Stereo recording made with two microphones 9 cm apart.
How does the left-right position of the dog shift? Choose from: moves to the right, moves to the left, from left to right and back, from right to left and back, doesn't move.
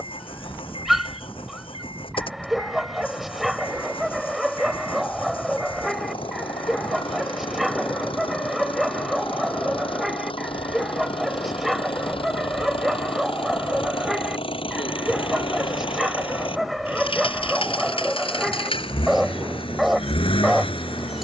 doesn't move.